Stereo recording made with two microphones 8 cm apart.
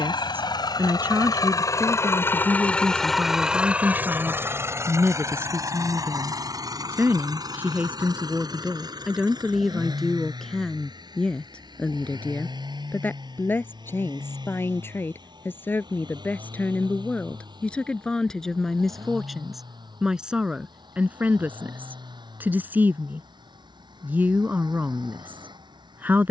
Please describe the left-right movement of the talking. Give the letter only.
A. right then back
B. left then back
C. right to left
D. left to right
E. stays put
B.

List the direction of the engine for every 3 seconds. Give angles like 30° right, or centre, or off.
50° left, 30° right, 60° right, 60° right, 70° right, 70° right, 70° right, 70° right, 70° right.